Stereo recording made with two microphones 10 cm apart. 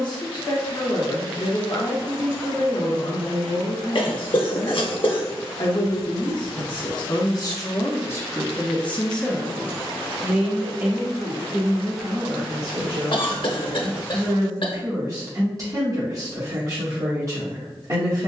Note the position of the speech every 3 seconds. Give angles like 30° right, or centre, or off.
50° left, 50° left, 40° left, 20° right, 40° right, 40° right.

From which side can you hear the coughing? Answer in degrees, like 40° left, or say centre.
60° left.